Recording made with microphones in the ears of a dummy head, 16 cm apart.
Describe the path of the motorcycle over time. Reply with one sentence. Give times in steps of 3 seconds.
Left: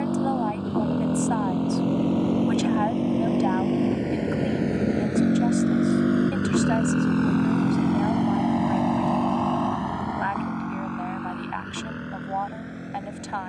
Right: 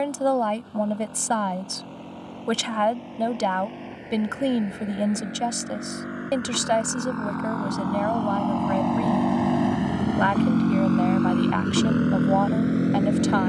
In this clip you hear the motorcycle on the left from 0 s and on the right from 9 s.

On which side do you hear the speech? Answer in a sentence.
You can hear the speech on the right.